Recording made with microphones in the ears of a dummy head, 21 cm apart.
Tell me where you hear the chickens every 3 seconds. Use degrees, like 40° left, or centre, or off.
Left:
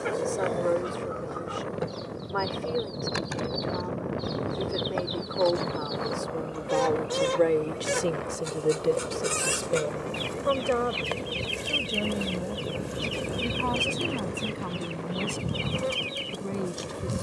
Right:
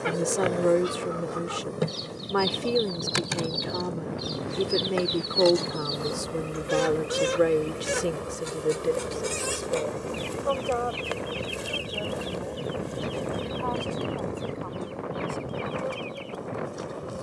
50° right, 40° right, 10° right, 20° left, 40° left, 50° left.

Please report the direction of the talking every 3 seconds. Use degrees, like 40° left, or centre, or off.
50° right, 50° right, 10° right, 30° left, 40° left, 50° left.